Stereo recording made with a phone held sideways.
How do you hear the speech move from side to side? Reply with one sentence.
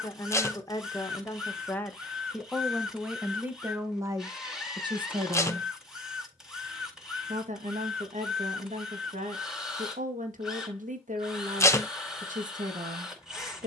In this clip you hear the speech move from left to right.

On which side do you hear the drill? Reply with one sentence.
You can hear the drill in the centre.